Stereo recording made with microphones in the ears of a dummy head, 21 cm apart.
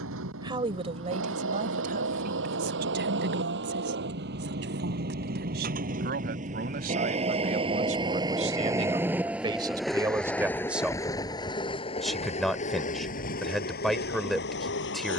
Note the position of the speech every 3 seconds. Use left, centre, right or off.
right, right, right, centre, centre.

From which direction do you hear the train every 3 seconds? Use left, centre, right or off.
right, right, right, centre, left.